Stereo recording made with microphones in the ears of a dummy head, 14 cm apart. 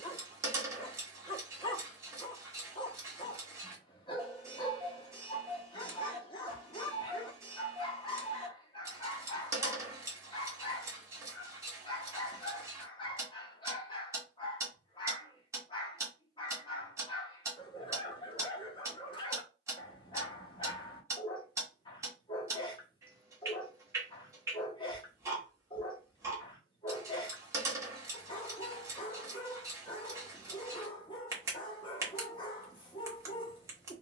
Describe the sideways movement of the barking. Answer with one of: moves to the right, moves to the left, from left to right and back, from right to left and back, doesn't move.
doesn't move.